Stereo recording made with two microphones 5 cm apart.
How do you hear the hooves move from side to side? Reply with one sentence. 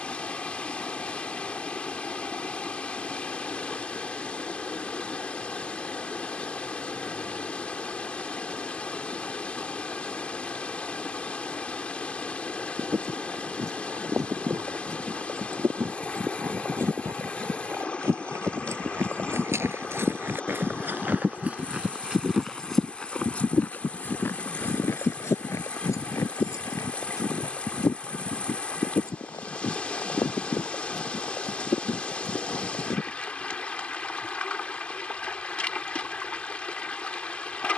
You can hear the hooves move from right to left.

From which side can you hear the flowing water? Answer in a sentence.
In this clip you hear the flowing water on the left.